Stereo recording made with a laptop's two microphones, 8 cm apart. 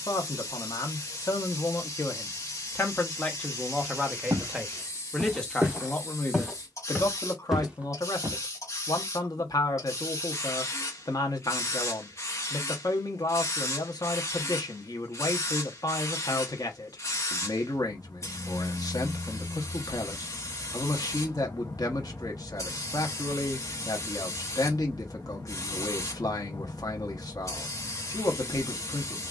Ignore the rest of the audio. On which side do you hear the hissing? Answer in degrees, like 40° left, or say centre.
40° left.